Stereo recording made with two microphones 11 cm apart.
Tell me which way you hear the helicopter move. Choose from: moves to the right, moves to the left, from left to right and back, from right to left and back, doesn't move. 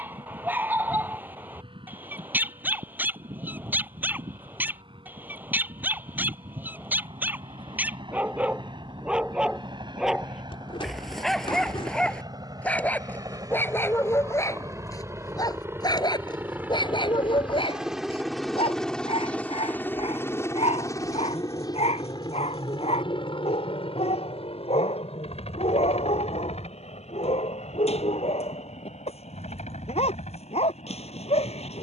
moves to the left.